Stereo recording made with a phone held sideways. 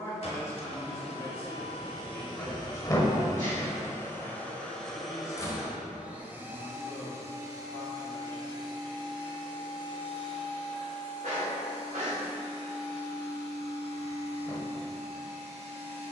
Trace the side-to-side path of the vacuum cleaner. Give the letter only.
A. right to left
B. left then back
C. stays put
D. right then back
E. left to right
E.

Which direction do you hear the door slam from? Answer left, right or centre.
left.